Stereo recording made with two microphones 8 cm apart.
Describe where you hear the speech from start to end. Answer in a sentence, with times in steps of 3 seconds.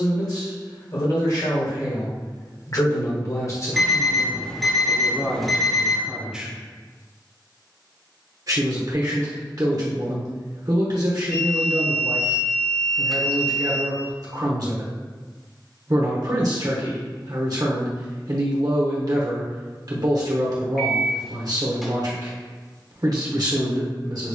In this clip you hear the speech on the left from 0 s and on the right from 6 s.